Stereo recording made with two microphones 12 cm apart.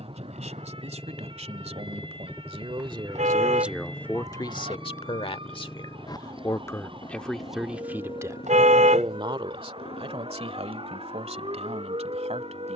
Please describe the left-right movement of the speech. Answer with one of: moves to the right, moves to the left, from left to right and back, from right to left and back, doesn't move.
from right to left and back.